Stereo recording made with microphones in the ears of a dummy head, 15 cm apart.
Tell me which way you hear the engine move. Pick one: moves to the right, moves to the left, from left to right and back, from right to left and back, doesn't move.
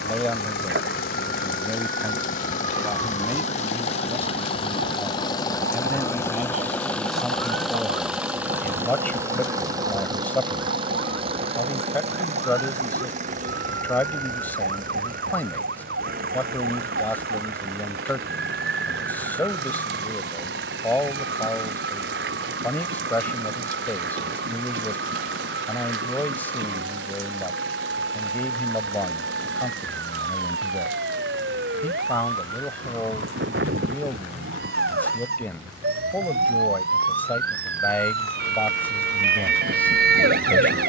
moves to the right.